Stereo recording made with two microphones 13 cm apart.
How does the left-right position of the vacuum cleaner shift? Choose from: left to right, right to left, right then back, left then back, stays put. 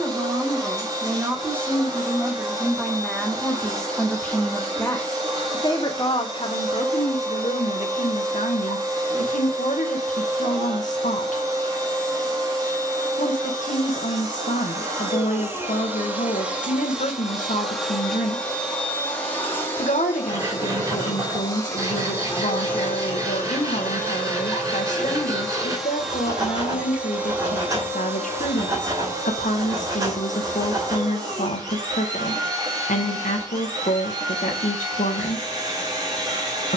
left then back.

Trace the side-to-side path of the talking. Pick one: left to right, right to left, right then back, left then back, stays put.
right to left.